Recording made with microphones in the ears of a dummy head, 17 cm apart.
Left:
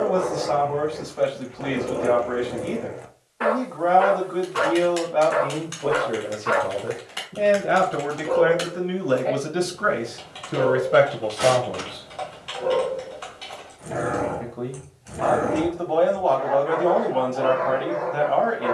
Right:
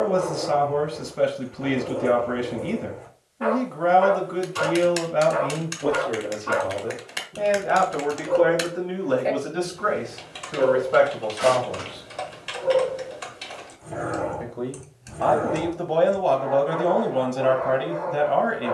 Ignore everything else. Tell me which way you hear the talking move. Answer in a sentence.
In this clip you hear the talking move from right to left and back again.